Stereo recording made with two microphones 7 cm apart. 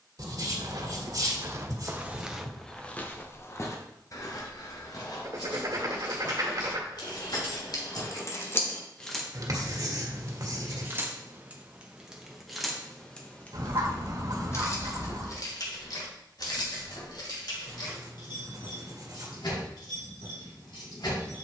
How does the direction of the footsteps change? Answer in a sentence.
You can hear the footsteps travel towards the left.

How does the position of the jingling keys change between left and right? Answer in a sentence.
You can hear the jingling keys go right and come back.